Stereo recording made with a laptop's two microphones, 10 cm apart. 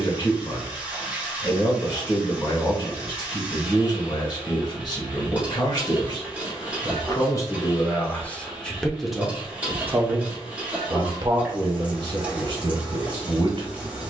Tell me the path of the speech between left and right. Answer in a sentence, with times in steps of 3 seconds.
You can hear the speech on the left from 0 s and on the right from 9 s.